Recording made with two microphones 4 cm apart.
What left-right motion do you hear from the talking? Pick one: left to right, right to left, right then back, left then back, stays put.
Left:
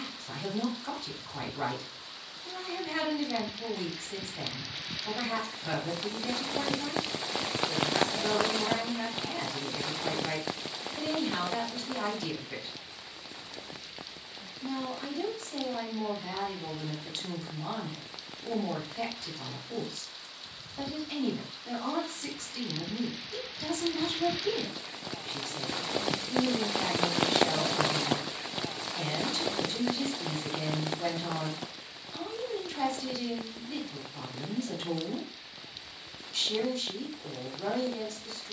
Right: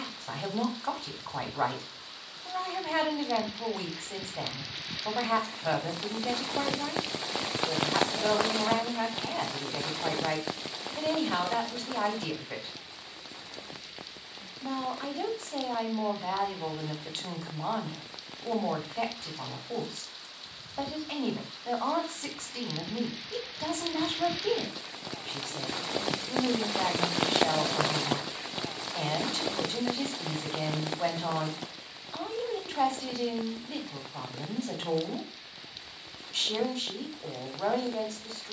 stays put.